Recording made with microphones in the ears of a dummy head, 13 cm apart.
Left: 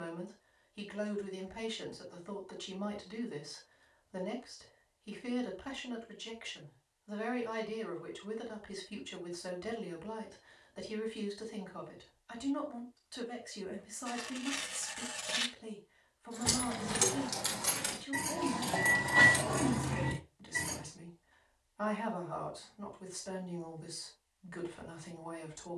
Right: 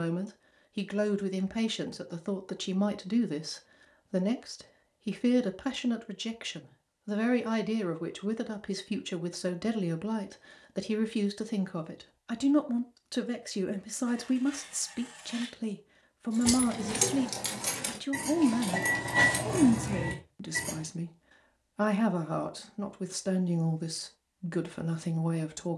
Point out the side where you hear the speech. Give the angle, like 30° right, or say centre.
70° right.